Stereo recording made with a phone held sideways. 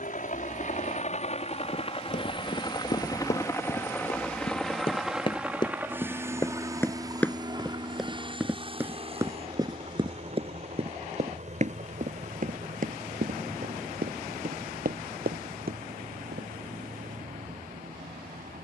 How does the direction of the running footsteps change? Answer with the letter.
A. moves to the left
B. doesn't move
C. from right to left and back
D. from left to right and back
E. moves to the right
E.